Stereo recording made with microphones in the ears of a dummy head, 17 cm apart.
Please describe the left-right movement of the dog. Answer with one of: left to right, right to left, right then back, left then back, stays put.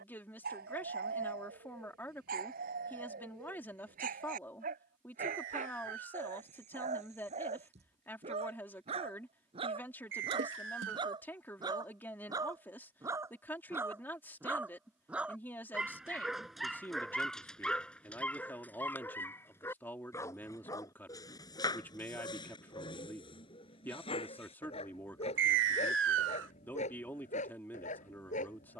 right to left.